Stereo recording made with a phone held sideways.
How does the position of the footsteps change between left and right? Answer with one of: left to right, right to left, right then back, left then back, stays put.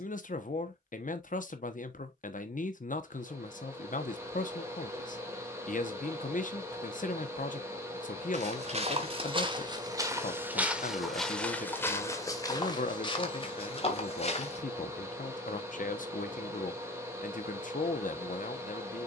right to left.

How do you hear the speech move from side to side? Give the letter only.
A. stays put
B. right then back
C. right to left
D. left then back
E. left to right
A.